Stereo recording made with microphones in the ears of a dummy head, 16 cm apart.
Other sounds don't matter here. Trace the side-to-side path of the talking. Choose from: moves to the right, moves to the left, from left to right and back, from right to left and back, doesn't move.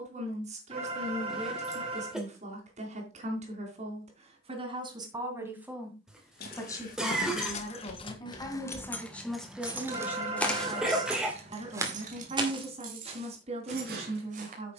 from right to left and back.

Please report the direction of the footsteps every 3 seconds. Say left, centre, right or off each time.
off, off, left, centre, right.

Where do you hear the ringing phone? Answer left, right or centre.
right.